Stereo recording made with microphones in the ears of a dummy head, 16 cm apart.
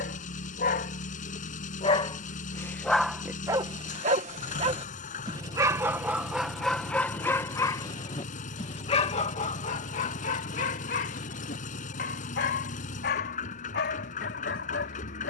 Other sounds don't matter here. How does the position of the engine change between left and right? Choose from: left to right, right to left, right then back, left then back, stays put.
stays put.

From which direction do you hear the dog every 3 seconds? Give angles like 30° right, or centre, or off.
30° left, 20° right, 10° left, 40° left, 60° left.